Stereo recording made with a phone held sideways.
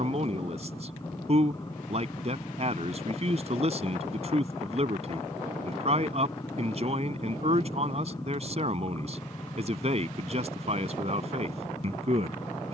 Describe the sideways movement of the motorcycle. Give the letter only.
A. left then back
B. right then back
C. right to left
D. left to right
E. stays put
E.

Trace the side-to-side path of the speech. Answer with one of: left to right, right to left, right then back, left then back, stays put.
stays put.